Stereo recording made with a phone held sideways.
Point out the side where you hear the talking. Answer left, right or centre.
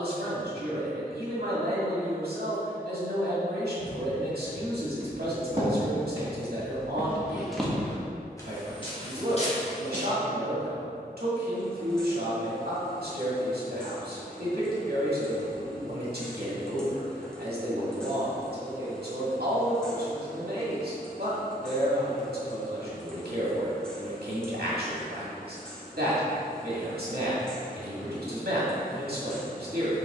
right.